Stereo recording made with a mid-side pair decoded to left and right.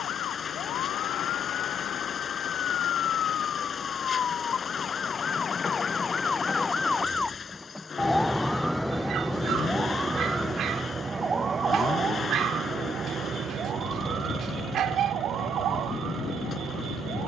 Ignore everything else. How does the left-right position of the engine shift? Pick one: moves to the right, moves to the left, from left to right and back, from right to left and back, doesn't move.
doesn't move.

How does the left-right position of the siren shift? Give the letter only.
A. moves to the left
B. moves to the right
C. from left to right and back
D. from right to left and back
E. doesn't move
B.